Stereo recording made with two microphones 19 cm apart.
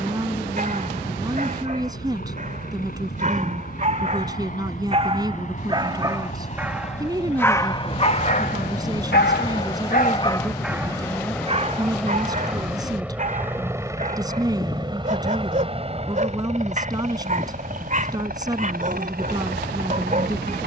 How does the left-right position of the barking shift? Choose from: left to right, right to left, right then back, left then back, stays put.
left then back.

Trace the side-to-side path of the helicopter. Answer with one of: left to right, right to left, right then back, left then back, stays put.
left to right.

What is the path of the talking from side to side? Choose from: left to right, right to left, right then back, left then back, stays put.
stays put.